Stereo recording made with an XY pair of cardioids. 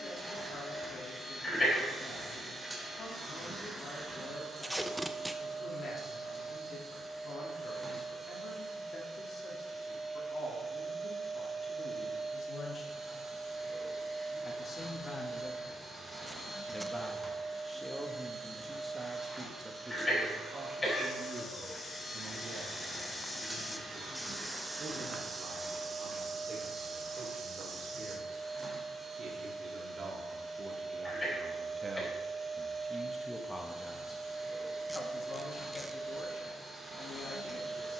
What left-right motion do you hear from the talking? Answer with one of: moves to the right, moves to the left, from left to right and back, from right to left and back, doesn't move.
from left to right and back.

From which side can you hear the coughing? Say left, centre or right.
left.